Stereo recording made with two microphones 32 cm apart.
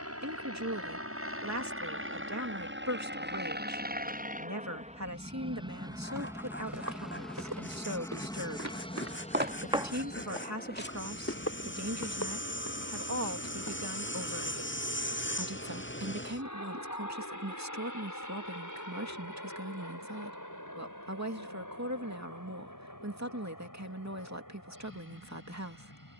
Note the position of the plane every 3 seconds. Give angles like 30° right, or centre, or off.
50° right, 20° right, centre, 30° left, 50° left, 60° left, 60° left, 70° left, 70° left.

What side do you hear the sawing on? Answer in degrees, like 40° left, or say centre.
40° left.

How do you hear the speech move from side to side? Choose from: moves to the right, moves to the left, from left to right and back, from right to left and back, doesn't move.
doesn't move.